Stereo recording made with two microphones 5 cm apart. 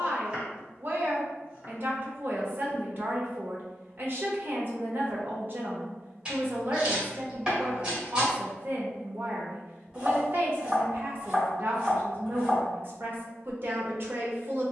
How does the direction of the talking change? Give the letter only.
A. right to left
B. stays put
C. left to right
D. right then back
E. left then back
B.